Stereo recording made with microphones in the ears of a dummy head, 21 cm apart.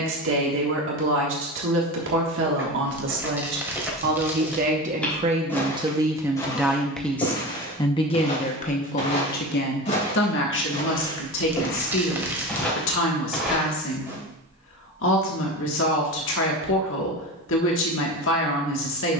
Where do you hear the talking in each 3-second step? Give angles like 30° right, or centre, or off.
60° right, 40° right, 10° left, 50° left, 60° left, 60° left, 60° left.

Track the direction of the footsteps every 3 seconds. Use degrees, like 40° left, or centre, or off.
10° right, centre, 20° left, 30° left, centre, off, off.